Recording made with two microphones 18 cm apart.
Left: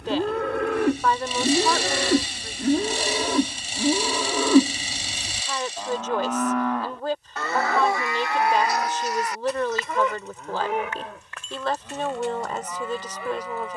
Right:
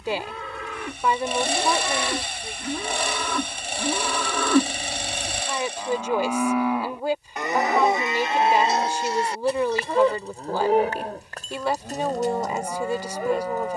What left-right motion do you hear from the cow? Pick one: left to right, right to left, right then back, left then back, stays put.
left to right.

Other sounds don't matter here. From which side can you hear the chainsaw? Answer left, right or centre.
right.